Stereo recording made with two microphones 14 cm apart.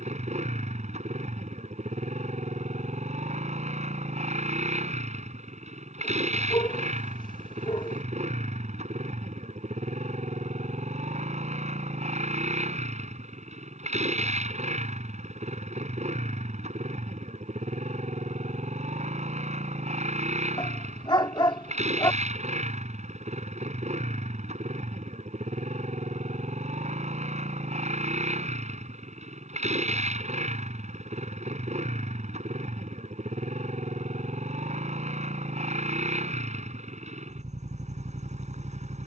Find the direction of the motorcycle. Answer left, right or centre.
right.